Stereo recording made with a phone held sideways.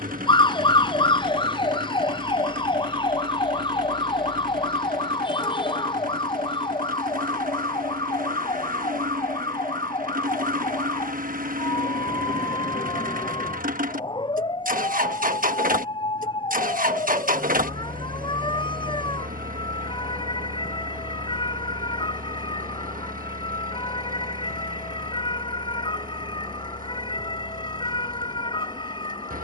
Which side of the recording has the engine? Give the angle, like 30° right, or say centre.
70° right.